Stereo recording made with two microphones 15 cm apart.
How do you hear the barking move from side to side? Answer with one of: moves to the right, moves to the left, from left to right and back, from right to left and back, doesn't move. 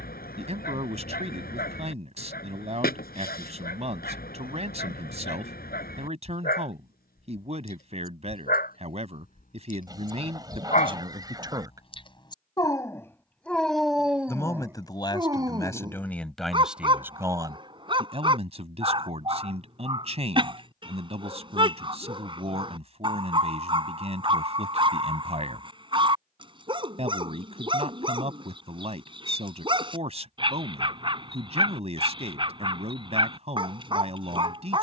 moves to the right.